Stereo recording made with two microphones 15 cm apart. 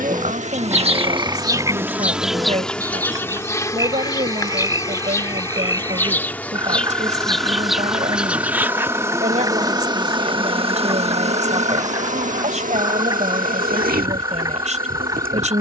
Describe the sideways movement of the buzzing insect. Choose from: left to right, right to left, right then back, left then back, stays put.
left then back.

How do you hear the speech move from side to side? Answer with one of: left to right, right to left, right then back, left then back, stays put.
stays put.